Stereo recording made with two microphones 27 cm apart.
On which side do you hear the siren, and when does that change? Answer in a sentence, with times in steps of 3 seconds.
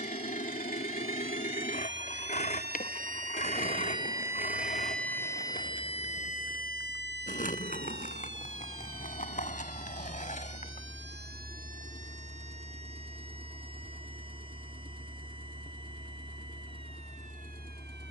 In this clip you hear the siren on the right from 0 s, in the centre from 3 s and on the left from 6 s.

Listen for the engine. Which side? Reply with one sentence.
You can hear the engine on the left.